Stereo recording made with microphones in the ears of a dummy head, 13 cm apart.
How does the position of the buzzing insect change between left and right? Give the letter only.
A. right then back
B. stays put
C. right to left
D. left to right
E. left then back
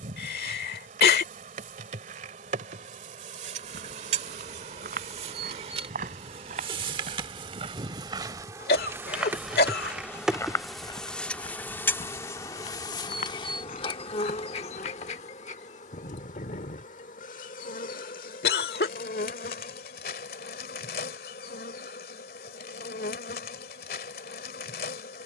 C.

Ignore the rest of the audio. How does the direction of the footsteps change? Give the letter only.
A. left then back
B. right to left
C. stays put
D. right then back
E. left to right
B.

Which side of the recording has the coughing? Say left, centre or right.
left.